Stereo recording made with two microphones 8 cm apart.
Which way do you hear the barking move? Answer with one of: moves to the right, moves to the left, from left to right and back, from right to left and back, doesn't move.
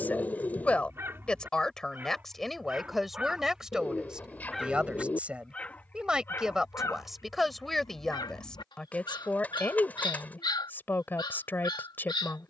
moves to the left.